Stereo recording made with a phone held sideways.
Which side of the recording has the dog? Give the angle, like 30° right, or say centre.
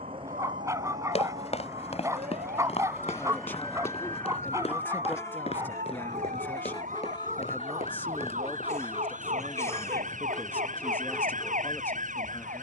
20° right.